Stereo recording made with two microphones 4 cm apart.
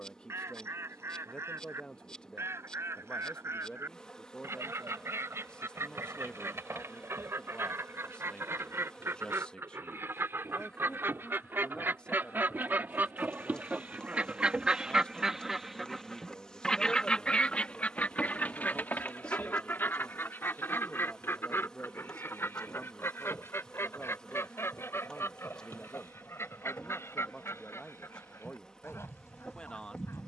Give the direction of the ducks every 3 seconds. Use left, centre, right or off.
right, right, right, right, right, centre, left, left, left, left.